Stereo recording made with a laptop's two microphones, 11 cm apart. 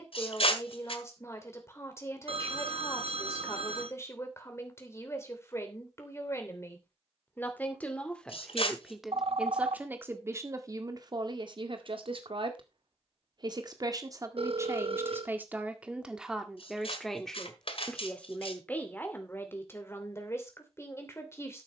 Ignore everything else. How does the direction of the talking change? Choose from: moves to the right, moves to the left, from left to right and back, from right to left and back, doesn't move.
from left to right and back.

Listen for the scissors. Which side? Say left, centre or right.
left.